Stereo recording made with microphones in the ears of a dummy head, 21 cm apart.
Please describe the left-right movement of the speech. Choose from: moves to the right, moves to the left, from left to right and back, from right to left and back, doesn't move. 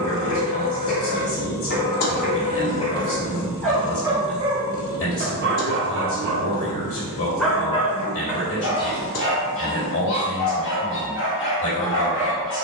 doesn't move.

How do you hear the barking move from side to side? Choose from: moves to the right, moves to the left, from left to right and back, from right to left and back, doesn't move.
from left to right and back.